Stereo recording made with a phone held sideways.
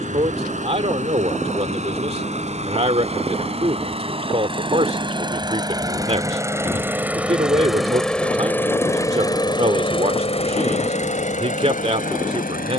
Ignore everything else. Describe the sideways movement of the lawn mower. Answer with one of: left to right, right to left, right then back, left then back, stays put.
right to left.